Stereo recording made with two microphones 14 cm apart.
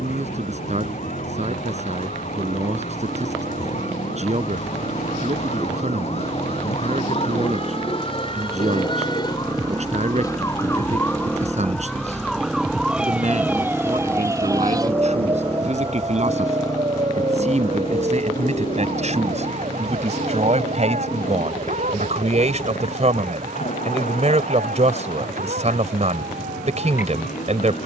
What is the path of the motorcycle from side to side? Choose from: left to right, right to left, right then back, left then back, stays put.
right to left.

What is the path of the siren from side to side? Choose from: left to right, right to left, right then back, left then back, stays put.
left to right.